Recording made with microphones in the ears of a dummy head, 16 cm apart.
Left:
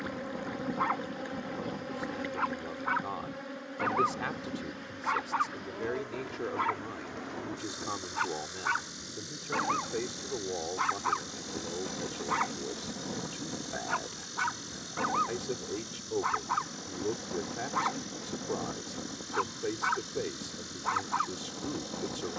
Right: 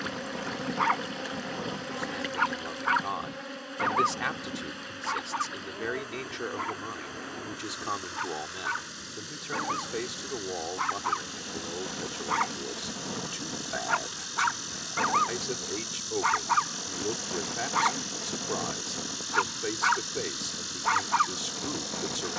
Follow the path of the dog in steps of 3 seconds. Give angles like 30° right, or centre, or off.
60° right, 10° right, 20° left, centre, 30° right, 50° right, 50° right, 50° right.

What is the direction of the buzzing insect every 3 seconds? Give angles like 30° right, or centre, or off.
40° right, 10° right, centre, centre, 20° right, 30° right, 40° right, 40° right.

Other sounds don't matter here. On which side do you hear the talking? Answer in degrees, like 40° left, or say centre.
40° right.